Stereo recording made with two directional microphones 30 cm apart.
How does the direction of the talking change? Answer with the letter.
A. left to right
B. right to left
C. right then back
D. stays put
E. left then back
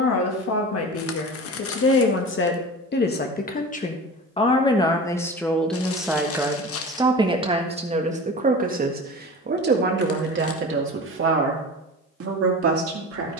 A.